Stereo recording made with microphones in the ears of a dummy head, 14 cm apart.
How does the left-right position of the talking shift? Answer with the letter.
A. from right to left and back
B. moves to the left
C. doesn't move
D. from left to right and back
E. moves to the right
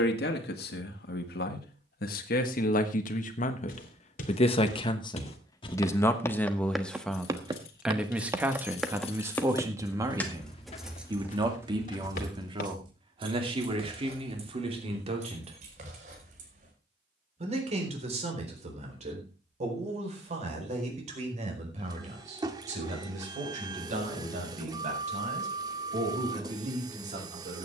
E.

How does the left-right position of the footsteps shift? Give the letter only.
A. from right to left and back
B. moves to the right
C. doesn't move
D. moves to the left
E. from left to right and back
E.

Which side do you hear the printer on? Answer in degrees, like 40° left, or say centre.
20° right.